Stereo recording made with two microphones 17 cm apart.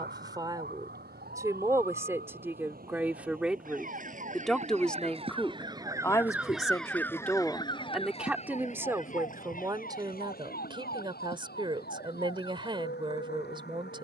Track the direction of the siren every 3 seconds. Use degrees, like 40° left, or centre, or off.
70° right, 40° right, 20° left, 60° left, 70° left.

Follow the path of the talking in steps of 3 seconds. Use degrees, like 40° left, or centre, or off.
20° right, centre, centre, 30° right, 30° right.